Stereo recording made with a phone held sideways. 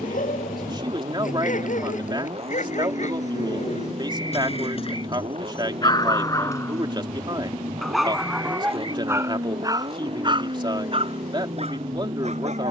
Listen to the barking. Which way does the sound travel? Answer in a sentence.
In this clip you hear the barking move to the right.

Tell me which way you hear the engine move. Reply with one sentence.
In this clip you hear the engine stay put.